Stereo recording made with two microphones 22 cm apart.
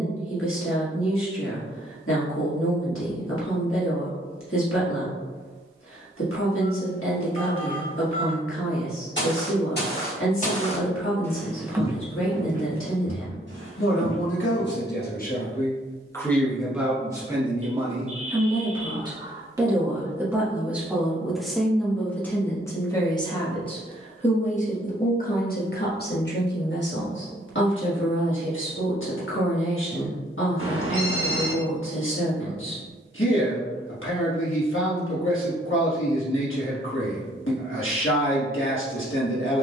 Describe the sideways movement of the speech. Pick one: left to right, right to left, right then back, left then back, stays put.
right then back.